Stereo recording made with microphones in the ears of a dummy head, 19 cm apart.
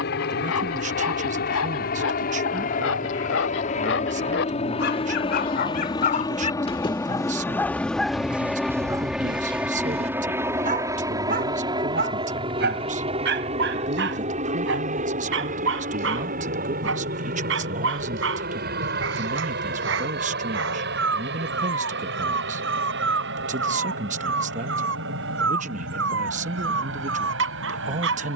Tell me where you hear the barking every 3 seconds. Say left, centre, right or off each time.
left, left, centre, right, right, right, right, right, right, right.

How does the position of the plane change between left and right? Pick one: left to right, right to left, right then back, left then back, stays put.
left to right.